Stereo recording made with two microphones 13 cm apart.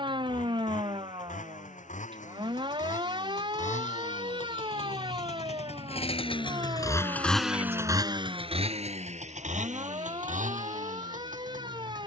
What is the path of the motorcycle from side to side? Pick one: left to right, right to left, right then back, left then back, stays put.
left to right.